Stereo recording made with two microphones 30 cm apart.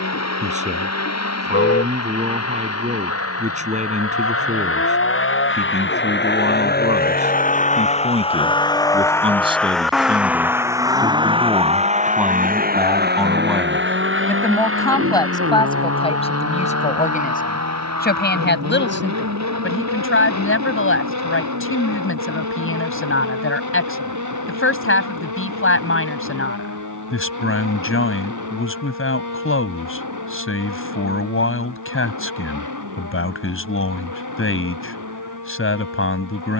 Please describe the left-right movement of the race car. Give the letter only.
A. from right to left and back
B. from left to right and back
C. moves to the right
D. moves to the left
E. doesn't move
C.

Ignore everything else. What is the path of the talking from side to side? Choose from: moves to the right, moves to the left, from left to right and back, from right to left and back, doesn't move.
moves to the left.